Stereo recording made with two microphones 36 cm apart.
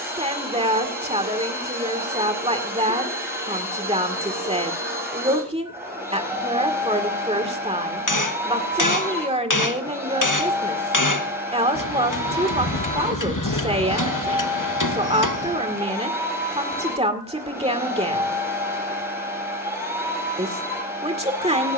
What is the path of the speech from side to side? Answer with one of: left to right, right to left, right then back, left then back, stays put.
stays put.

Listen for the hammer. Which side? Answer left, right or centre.
left.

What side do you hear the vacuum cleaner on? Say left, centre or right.
centre.